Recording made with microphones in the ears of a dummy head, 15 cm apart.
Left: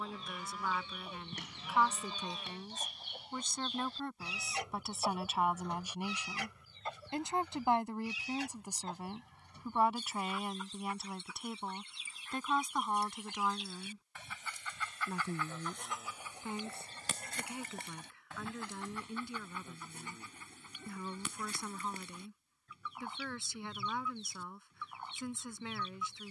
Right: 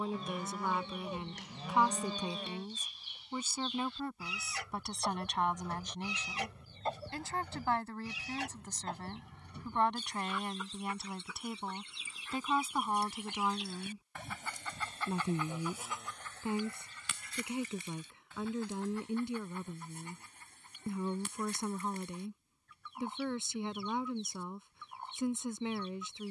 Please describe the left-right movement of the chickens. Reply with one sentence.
You can hear the chickens go right and come back.